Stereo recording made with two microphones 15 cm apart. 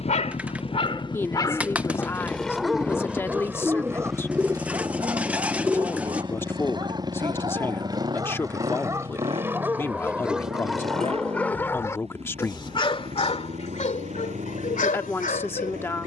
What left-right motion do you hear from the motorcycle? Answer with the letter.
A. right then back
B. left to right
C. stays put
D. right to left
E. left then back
B.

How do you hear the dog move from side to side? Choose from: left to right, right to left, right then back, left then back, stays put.
right then back.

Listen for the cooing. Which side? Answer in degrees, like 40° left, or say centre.
10° right.